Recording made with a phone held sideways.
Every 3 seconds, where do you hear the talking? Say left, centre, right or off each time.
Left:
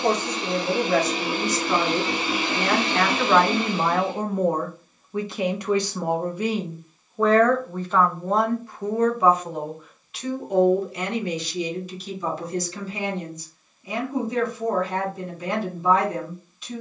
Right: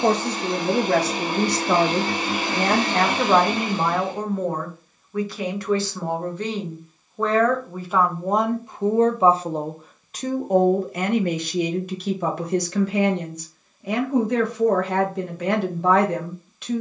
right, centre, centre, right, right, right.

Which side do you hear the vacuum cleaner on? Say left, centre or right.
right.